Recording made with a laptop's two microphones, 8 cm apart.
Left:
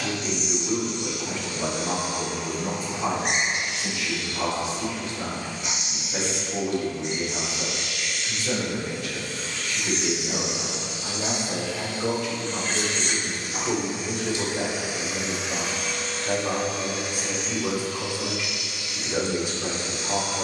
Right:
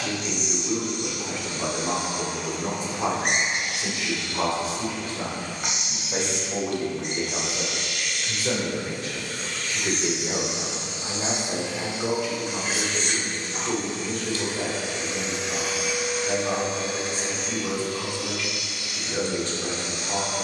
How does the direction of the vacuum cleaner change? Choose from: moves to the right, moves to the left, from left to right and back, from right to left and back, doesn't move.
from right to left and back.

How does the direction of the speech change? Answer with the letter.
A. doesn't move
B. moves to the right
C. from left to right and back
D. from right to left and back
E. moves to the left
C.